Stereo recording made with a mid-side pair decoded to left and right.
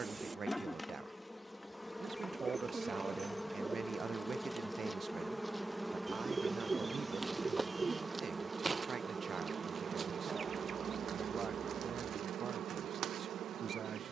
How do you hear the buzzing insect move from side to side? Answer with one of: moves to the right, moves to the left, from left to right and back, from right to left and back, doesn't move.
moves to the right.